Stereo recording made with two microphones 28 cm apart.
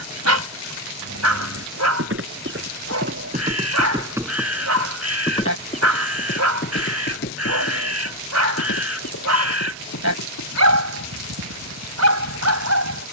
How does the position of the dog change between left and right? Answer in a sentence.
In this clip you hear the dog stay in one place.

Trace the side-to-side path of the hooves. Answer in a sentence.
In this clip you hear the hooves go from the right side to the left.